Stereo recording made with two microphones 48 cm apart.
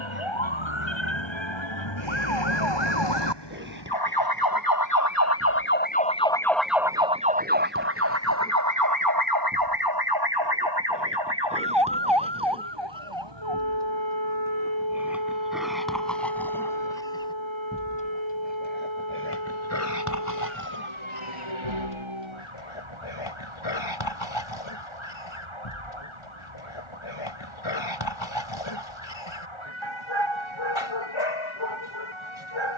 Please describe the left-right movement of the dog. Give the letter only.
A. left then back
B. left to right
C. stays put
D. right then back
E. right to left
E.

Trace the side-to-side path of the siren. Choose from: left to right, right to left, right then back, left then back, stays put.
left to right.